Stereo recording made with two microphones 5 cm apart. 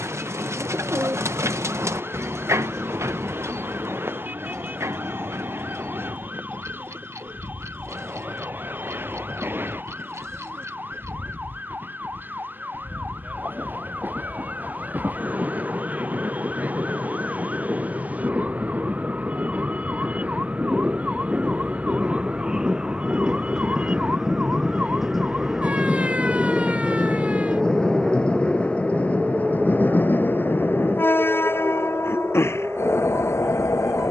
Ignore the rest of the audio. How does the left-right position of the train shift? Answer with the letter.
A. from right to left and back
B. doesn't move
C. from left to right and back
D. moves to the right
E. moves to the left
E.